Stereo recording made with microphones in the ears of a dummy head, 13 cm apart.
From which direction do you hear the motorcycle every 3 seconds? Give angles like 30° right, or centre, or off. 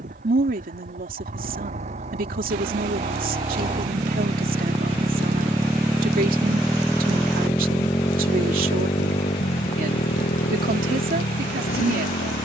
50° right, 30° right, 10° left, 50° left.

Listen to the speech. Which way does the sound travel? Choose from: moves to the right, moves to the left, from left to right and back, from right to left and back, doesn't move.
doesn't move.